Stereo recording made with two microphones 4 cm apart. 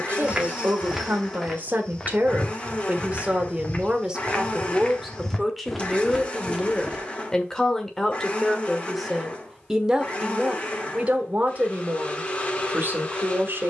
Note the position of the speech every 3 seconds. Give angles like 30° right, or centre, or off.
40° right, 10° right, 10° left, 20° right, 50° right.